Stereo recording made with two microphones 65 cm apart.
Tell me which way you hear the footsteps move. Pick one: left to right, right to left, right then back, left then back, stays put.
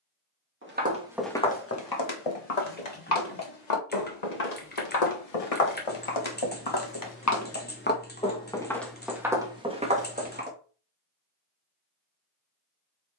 left then back.